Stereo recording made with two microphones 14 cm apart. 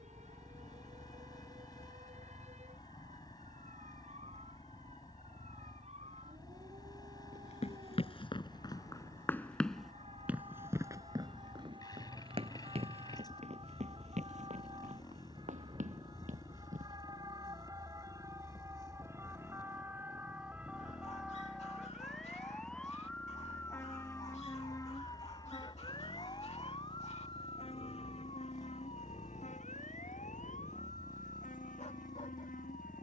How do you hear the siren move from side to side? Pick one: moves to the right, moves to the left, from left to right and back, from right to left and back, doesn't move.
moves to the left.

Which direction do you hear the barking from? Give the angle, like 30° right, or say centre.
50° left.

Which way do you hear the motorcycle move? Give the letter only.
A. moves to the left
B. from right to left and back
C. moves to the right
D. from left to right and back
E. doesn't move
E.